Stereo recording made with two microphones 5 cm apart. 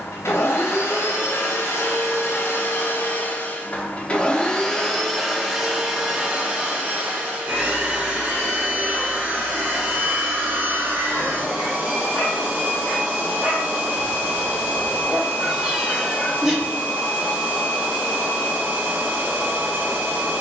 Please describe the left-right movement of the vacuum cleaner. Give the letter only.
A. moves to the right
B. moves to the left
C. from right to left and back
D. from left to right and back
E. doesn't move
A.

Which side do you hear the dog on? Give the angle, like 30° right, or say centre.
40° right.